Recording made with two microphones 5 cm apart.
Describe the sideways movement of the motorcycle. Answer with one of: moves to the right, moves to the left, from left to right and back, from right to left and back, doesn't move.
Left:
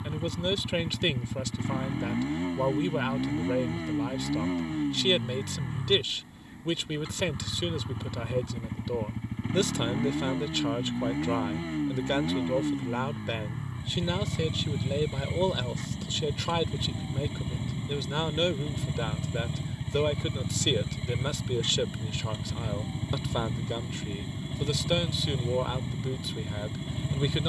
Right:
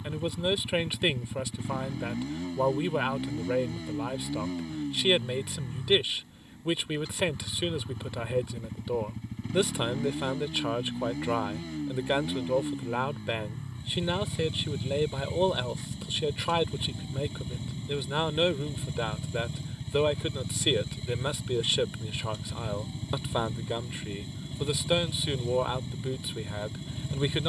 doesn't move.